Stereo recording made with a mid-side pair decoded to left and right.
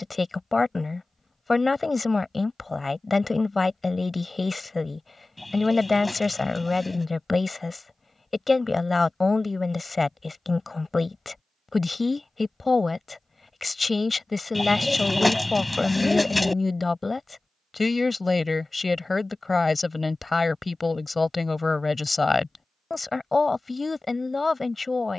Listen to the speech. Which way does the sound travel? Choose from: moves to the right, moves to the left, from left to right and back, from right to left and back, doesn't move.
doesn't move.